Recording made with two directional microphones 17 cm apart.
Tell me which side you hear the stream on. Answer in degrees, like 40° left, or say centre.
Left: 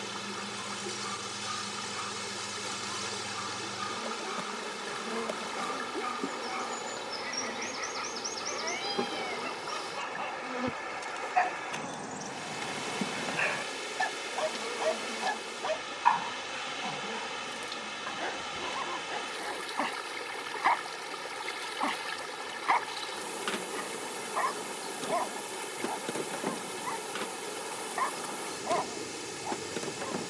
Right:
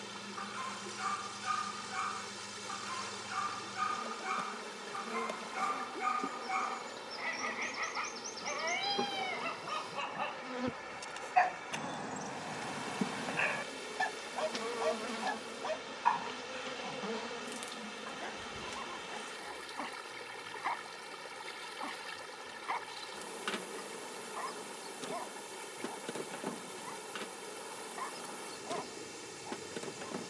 40° left.